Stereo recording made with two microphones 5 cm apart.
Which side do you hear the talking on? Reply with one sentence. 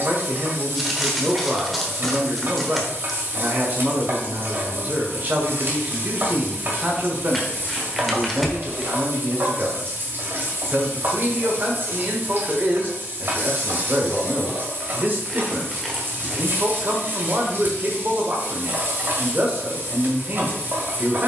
You can hear the talking on the right.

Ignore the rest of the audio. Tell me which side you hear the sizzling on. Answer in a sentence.
In this clip you hear the sizzling on the right.